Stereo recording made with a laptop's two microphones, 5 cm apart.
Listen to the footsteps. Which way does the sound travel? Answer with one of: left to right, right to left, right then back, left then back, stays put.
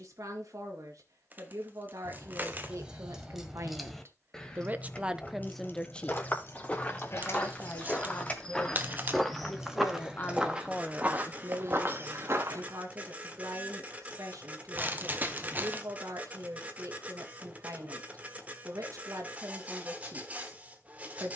left to right.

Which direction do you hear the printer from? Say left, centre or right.
right.